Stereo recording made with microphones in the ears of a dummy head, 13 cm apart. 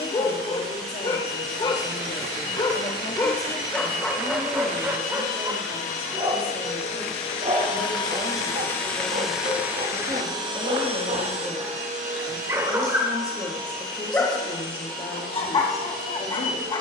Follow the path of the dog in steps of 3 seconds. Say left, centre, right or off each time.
left, centre, right, right, centre, left.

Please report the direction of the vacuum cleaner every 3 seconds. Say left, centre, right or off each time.
left, left, left, right, right, right.